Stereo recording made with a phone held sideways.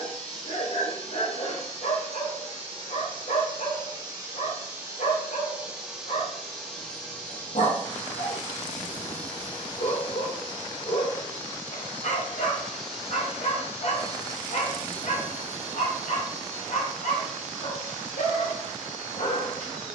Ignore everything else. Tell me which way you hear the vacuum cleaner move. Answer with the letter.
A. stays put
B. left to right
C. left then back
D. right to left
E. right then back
C.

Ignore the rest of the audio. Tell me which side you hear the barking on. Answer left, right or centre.
left.